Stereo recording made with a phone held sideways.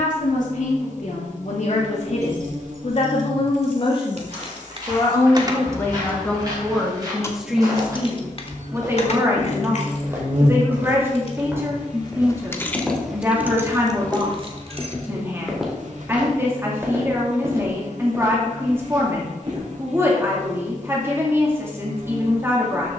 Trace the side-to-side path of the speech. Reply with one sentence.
In this clip you hear the speech move to the right.